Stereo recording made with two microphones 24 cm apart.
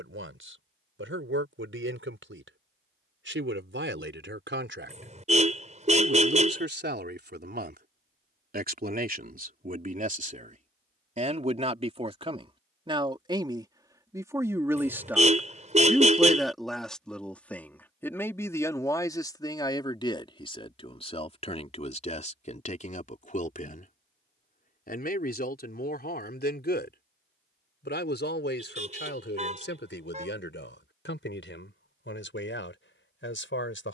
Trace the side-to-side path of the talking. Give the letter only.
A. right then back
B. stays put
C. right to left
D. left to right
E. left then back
C.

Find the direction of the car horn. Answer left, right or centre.
right.